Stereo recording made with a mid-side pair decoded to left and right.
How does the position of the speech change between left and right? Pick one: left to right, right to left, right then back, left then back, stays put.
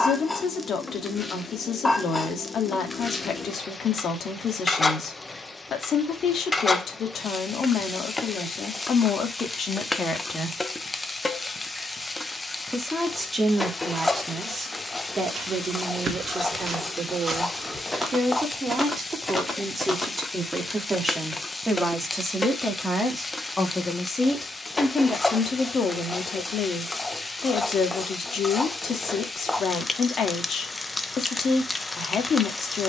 right then back.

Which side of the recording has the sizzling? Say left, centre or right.
centre.